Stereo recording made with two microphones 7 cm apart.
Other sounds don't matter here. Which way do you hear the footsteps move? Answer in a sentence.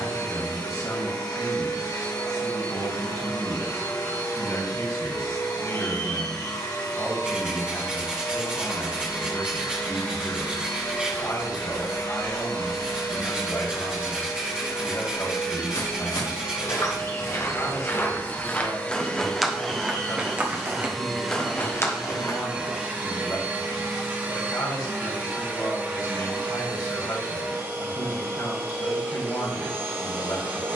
In this clip you hear the footsteps move from left to right and back again.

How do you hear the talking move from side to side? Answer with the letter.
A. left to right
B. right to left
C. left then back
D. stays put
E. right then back
D.